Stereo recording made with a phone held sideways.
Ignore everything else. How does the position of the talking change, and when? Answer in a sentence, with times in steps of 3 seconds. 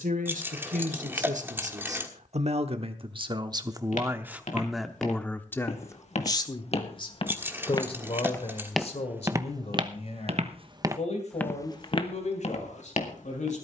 You can hear the talking on the right from 0 s, in the centre from 3 s and on the left from 6 s.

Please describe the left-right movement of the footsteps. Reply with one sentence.
You can hear the footsteps move from left to right and back again.